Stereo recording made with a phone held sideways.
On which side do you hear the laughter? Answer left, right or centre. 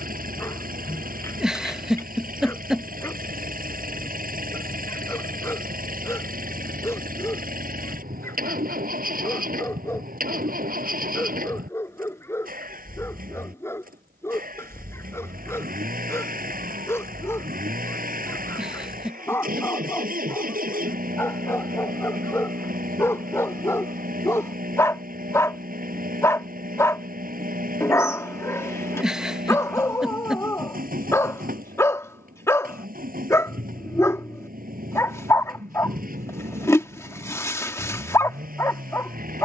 centre.